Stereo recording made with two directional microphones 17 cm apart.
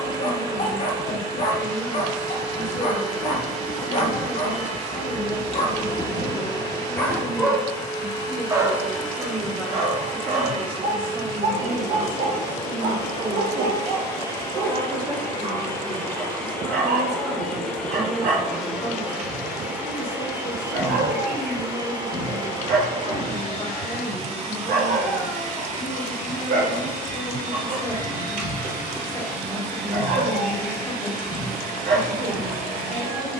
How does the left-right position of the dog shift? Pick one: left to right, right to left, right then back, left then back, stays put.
left to right.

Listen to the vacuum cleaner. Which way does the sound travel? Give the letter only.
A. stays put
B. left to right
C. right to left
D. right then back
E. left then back
B.